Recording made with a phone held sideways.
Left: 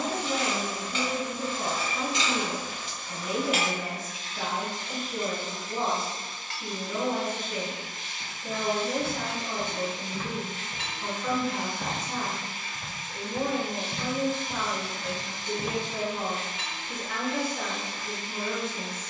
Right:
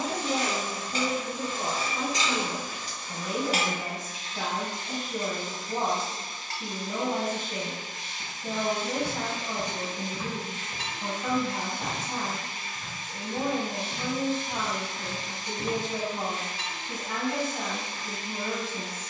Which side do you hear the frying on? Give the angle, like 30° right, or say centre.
40° right.